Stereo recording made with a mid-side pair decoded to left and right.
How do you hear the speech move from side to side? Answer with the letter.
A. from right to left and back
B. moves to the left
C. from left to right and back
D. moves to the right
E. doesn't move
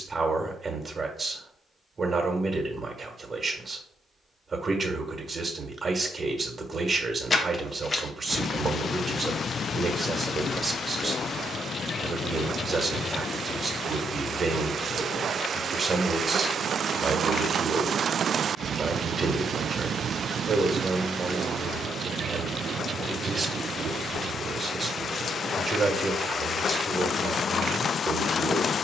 E.